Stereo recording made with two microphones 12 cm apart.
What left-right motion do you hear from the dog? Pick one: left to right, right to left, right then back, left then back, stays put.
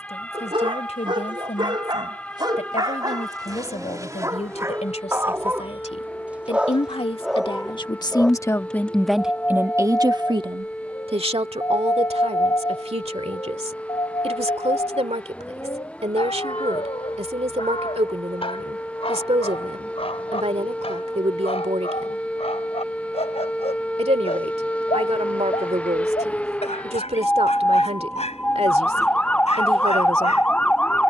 right to left.